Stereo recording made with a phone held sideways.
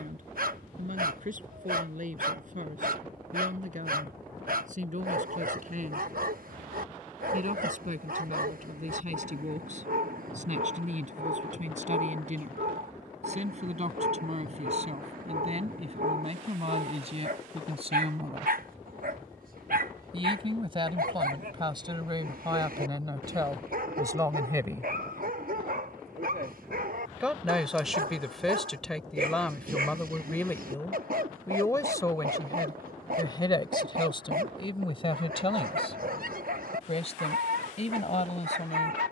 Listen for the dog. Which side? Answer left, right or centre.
right.